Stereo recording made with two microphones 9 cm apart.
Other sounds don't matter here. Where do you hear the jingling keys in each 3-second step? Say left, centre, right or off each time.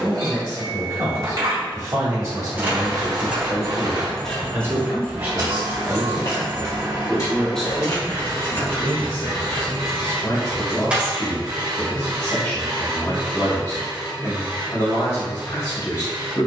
right, centre, left, centre, off, off.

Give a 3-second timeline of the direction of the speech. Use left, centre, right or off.
right, right, centre, left, left, left.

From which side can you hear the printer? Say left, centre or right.
right.